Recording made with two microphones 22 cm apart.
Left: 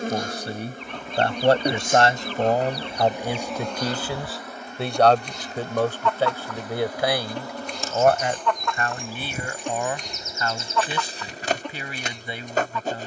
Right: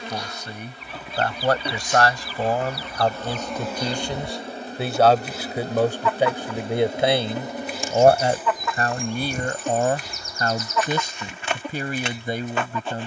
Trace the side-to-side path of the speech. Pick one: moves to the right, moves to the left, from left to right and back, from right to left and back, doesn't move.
moves to the right.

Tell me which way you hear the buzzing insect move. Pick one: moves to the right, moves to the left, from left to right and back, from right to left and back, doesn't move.
from left to right and back.